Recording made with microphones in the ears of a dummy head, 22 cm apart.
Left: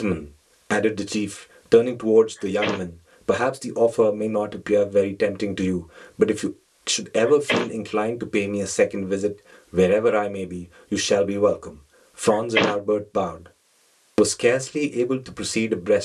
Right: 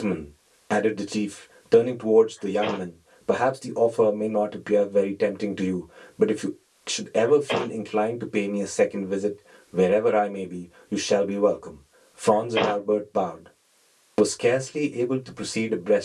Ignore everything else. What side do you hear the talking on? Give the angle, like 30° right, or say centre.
20° left.